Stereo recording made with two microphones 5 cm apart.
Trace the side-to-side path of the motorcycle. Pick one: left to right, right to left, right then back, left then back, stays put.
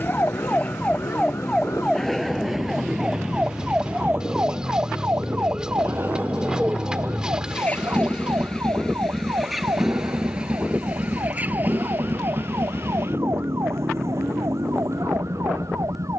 left to right.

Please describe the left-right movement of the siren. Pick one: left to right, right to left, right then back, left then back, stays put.
left to right.